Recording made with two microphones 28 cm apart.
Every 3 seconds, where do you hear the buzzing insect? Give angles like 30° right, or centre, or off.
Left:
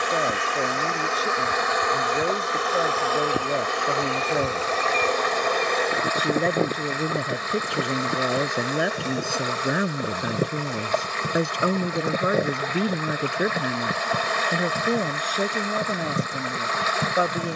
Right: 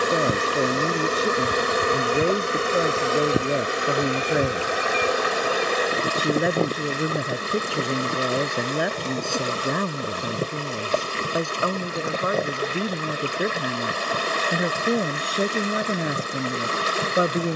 40° right, 20° right, centre, 20° left, 20° left, 30° left.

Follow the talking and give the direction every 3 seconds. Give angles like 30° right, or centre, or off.
30° right, 20° right, centre, 10° left, 10° left, 20° right.